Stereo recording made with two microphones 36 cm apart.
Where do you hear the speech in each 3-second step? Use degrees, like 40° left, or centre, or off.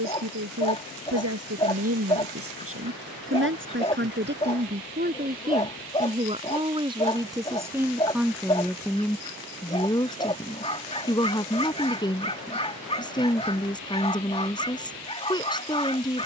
40° right, 30° right, 10° right, 10° left, 10° left, 10° left.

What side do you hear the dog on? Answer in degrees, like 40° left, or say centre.
20° left.